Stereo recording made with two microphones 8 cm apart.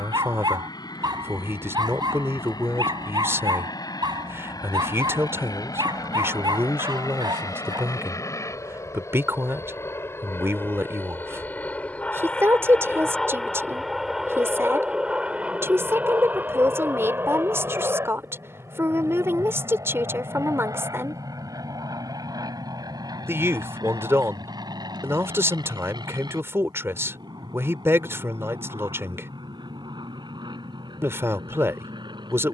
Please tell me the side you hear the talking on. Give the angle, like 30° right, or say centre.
30° right.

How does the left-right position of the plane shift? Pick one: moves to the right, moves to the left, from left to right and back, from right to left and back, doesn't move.
moves to the right.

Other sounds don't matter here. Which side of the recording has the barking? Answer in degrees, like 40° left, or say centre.
70° right.